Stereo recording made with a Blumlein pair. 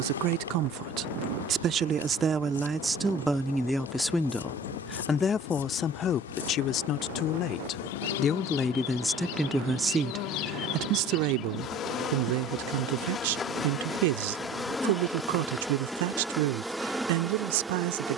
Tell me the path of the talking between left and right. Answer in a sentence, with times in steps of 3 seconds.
You can hear the talking on the right from 0 s, in the centre from 3 s, on the left from 6 s and on the right from 9 s.